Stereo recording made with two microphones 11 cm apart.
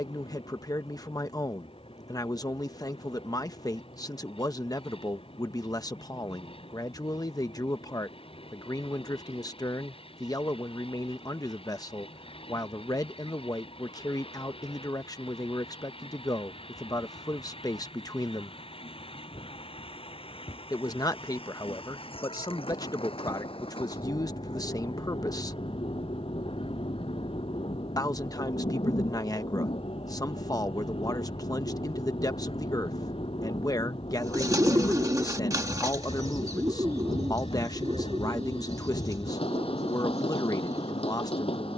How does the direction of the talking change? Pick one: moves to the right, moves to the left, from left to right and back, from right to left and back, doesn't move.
doesn't move.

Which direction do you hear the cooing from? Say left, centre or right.
right.